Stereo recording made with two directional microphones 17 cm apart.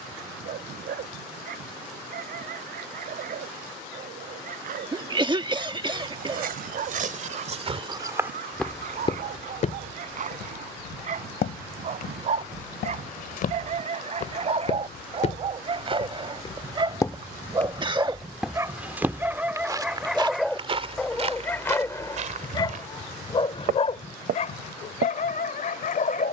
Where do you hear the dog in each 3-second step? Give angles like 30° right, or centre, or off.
60° right, 60° right, 50° right, 50° right, 40° right, 30° right, 10° right, 20° left, 50° left.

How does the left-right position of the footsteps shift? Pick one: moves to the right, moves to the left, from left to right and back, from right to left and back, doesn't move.
from right to left and back.